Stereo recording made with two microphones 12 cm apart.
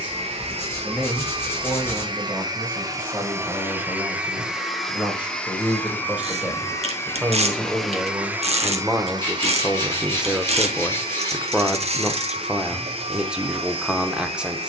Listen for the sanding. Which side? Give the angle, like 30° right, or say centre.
20° left.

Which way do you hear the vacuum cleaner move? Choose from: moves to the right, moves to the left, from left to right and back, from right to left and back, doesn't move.
from right to left and back.